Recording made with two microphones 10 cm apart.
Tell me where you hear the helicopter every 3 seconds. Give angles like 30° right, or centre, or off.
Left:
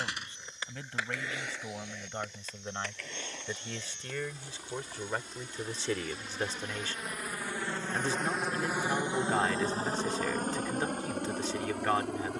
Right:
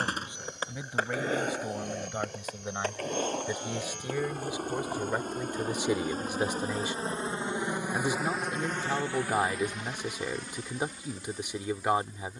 70° right, 60° right, 20° right, 40° left.